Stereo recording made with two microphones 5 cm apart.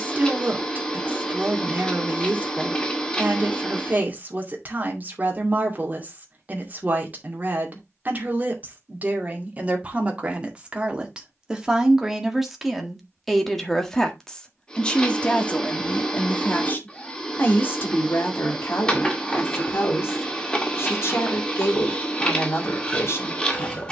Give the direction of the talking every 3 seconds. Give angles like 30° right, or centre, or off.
40° right, 40° right, 40° right, 20° right, centre, 30° left, 50° left, 60° left.